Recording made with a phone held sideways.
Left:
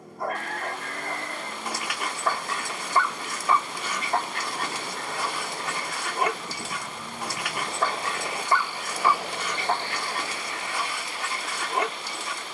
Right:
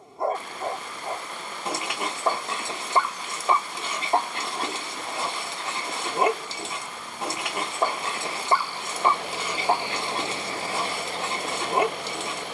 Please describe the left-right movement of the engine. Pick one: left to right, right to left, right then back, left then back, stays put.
left to right.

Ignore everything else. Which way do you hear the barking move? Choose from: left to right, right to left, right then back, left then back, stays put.
stays put.